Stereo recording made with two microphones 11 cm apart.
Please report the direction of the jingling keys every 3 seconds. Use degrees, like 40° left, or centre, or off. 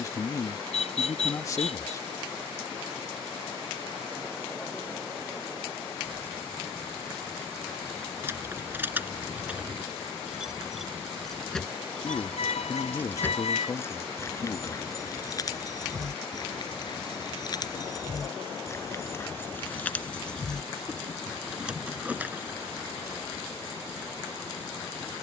off, off, 20° right, 10° right, 20° left, 40° left, 20° left, 10° right, off.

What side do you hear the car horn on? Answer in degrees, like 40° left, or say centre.
80° left.